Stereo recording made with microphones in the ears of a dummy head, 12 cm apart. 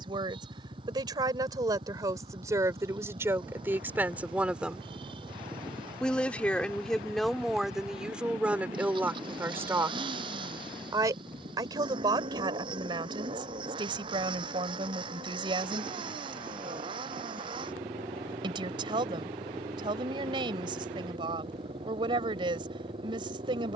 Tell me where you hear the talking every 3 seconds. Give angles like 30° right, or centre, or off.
30° right, 10° right, centre, 20° right, 40° right, 40° right, 40° right, 40° right.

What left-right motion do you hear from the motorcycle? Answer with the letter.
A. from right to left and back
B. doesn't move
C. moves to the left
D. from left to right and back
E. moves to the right
B.